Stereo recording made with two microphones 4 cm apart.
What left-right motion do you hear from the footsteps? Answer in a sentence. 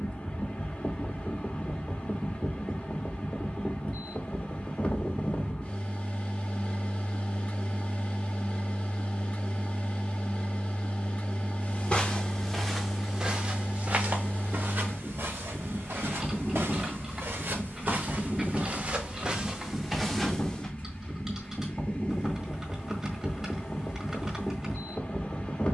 In this clip you hear the footsteps go right and come back.